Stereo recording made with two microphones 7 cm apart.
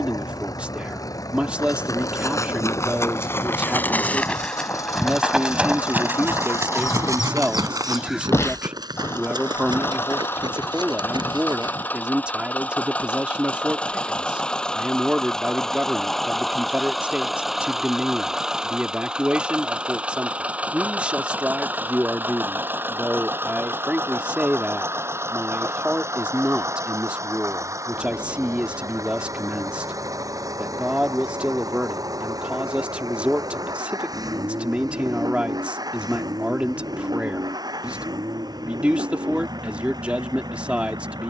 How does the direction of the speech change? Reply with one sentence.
In this clip you hear the speech stay in one place.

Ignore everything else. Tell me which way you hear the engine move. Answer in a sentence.
You can hear the engine move from left to right.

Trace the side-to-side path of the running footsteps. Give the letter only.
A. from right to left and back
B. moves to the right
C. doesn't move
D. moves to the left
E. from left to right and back
B.